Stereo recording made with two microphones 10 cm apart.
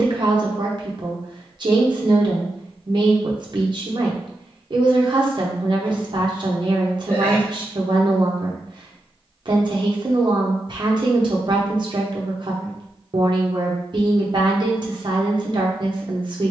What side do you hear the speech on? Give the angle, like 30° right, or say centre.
50° right.